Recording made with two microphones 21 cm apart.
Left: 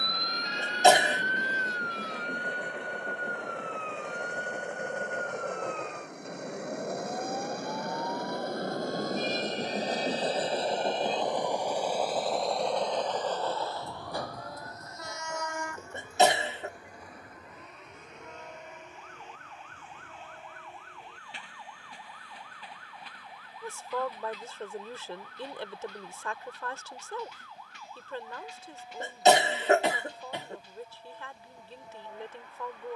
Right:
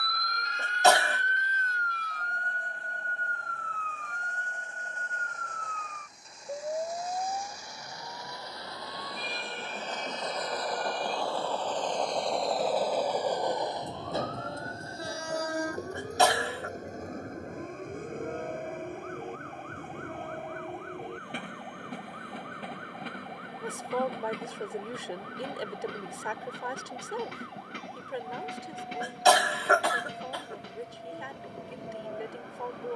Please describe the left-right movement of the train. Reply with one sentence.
You can hear the train travel towards the right.